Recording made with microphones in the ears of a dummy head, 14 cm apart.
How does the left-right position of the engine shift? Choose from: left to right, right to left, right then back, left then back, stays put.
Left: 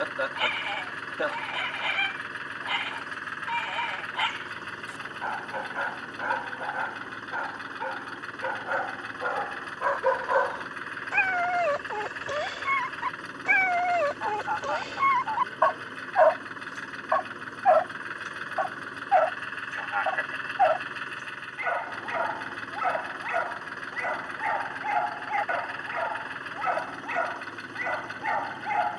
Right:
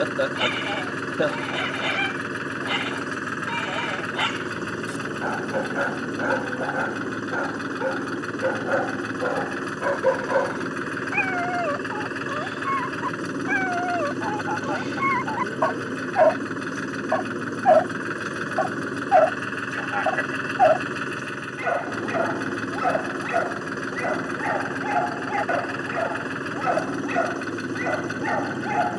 stays put.